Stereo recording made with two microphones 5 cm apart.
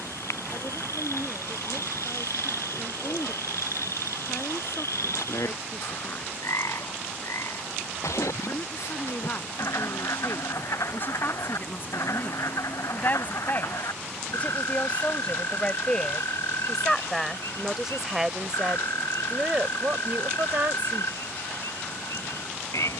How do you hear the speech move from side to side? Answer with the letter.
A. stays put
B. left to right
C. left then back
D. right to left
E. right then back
B.